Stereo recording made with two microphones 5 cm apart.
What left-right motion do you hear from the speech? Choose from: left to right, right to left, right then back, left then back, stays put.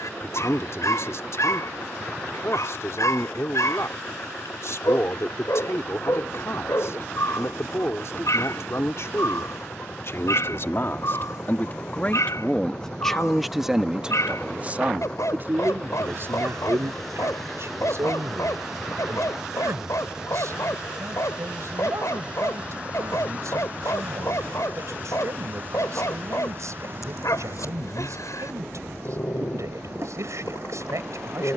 left to right.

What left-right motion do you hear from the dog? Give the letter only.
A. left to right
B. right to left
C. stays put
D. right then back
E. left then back
C.